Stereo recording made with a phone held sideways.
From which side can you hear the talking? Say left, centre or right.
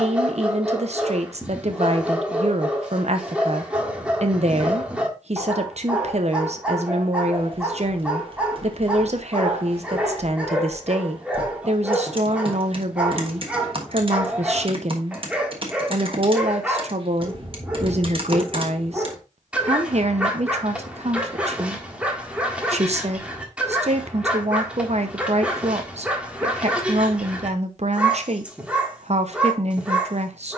right.